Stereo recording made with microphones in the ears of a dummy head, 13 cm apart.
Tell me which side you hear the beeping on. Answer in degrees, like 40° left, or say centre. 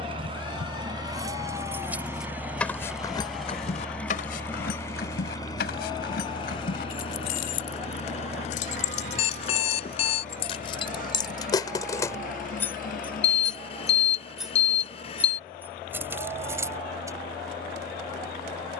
40° left.